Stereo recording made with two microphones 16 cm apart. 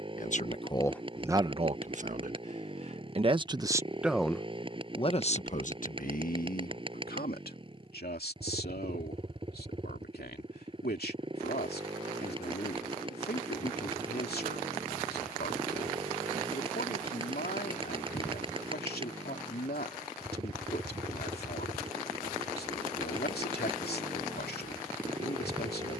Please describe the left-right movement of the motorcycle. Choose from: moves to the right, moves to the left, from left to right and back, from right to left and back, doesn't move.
doesn't move.